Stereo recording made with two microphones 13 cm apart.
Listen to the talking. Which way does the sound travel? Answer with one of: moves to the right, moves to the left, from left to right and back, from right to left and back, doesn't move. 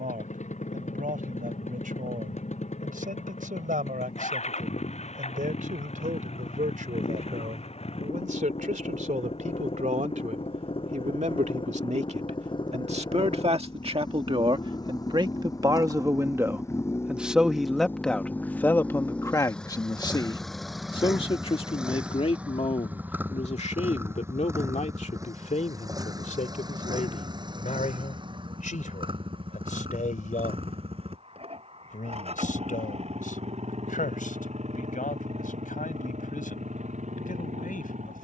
moves to the left.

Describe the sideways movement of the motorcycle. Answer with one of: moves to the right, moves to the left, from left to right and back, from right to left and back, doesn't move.
moves to the right.